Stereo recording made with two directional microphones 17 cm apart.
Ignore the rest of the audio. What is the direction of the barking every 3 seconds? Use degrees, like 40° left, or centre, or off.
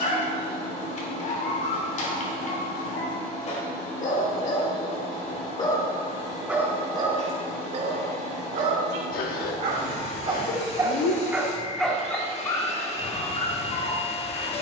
50° left, 40° left, 30° right, 20° right, 30° left.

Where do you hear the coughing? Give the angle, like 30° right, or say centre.
70° left.